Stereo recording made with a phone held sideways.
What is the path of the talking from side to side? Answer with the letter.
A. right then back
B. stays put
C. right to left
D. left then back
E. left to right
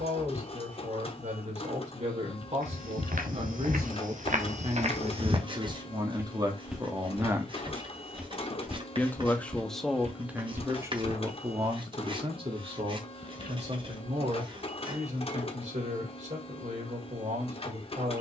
D.